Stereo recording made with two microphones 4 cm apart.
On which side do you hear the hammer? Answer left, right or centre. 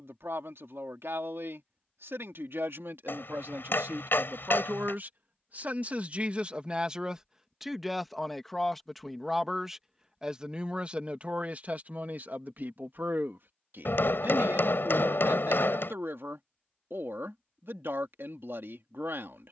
left.